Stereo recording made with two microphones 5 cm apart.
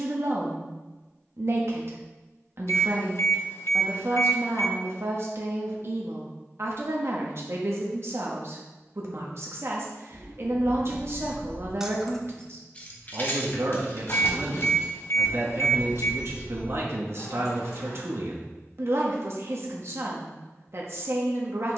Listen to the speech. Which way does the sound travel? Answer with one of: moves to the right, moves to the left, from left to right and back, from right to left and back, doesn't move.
doesn't move.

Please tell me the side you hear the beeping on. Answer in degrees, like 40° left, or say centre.
60° left.